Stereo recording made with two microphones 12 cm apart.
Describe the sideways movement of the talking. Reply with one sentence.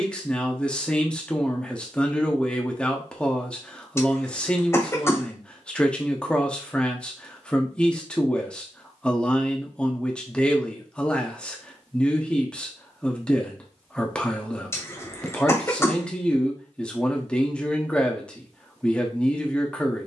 You can hear the talking stay put.